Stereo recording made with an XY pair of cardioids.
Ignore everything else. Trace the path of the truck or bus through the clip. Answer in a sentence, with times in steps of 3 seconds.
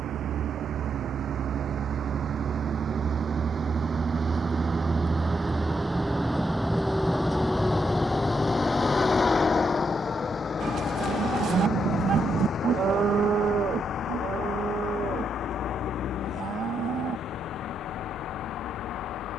You can hear the truck or bus on the right from 0 s, in the centre from 6 s and on the left from 9 s.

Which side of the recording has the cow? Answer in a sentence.
You can hear the cow on the right.